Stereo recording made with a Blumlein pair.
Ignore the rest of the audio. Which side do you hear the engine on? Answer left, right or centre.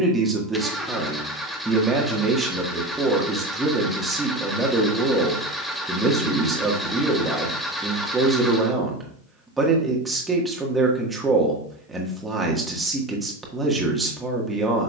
centre.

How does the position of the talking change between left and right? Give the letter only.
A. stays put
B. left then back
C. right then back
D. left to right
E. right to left
A.